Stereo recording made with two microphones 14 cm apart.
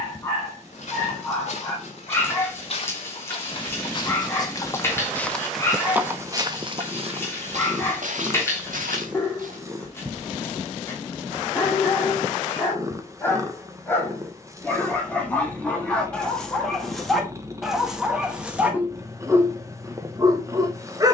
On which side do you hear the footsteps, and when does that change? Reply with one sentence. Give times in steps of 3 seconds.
In this clip you hear the footsteps on the left from 0 s, on the right from 6 s and not at all from 12 s.